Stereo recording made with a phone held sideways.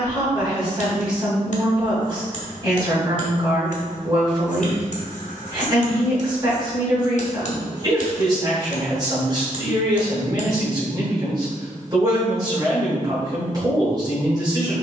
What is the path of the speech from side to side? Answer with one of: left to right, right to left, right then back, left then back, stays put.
stays put.